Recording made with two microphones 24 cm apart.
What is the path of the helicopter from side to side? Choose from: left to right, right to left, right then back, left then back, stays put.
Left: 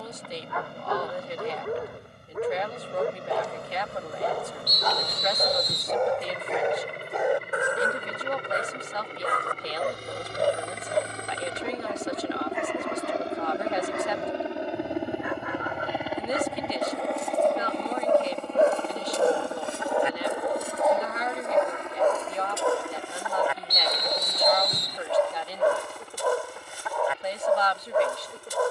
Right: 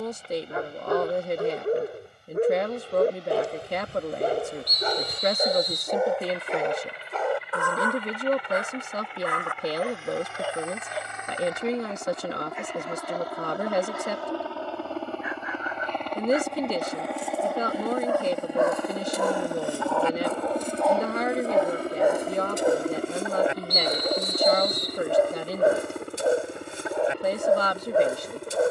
left to right.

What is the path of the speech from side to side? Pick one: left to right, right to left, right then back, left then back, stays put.
stays put.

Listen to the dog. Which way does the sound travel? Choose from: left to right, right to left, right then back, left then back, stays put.
left then back.